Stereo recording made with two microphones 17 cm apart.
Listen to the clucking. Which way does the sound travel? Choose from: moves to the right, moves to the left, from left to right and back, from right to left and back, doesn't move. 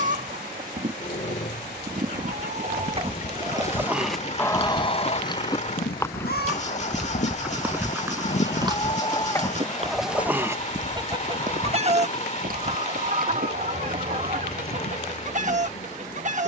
from right to left and back.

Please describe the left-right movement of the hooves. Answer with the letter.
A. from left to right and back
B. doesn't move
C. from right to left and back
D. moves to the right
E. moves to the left
D.